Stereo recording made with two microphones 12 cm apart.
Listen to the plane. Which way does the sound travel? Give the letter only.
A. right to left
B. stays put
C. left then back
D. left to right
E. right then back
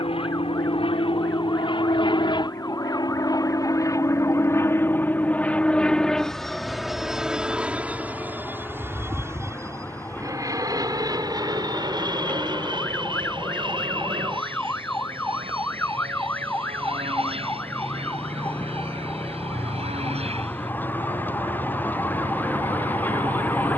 D.